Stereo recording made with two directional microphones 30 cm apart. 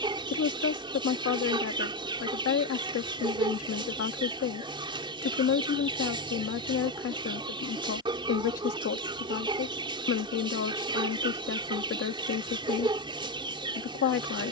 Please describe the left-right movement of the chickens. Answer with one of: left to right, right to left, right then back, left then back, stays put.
stays put.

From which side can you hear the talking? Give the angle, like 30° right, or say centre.
50° left.